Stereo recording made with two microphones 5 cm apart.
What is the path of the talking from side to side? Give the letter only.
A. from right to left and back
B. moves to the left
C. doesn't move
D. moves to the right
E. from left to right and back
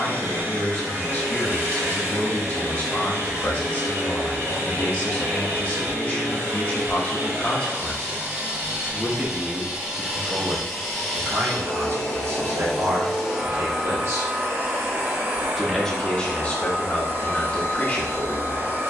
E.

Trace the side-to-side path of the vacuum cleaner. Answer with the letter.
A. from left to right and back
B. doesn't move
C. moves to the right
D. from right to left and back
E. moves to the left
D.